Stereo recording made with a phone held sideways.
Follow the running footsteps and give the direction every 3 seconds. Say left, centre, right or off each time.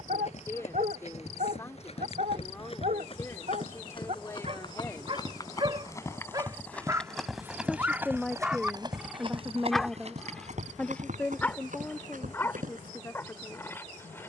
left, left, centre, right, right.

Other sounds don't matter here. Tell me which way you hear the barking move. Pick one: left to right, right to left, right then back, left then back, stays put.
right to left.